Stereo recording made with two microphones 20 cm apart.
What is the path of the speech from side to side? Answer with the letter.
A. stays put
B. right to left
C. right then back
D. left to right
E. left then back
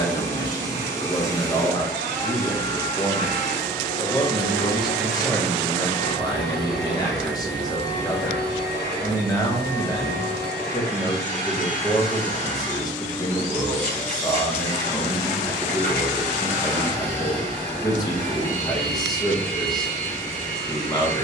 A.